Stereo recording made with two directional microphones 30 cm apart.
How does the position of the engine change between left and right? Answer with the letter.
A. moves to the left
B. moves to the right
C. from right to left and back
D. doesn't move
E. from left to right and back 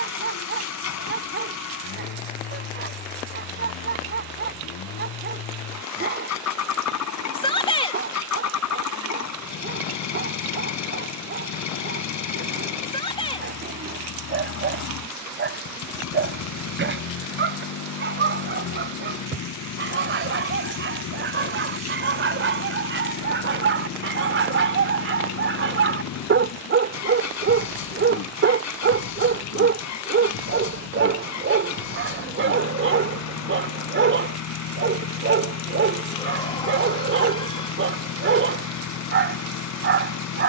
D.